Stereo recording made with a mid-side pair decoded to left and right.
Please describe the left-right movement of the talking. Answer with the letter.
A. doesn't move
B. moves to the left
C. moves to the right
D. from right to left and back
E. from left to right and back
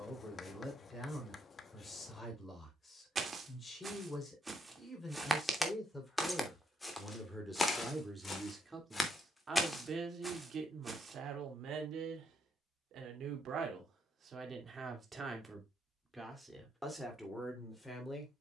E.